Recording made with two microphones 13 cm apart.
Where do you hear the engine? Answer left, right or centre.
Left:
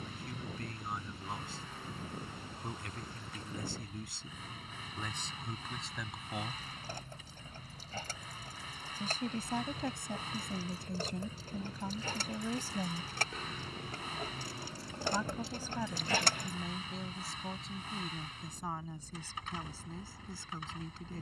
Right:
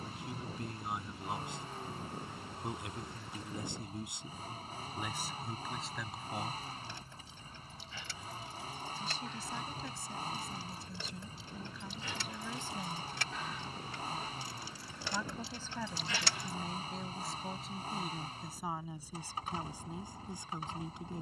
right.